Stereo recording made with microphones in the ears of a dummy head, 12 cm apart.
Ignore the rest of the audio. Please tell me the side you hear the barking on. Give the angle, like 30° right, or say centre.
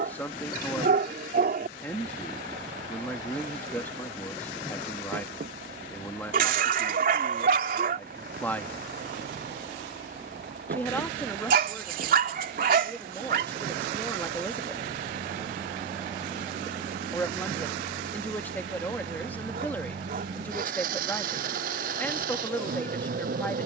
70° right.